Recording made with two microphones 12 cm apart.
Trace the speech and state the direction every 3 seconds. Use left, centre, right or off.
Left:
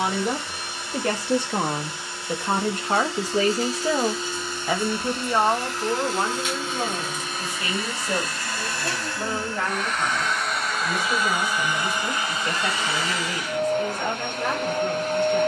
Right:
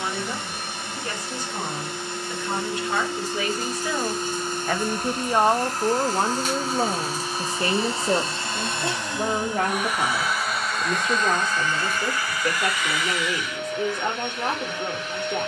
left, centre, right, right, right.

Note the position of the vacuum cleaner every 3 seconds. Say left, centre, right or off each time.
right, right, right, centre, left.